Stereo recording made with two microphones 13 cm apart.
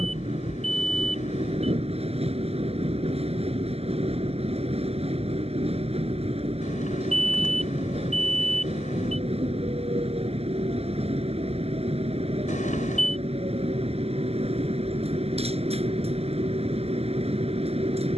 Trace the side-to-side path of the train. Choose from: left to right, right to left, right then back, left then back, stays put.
stays put.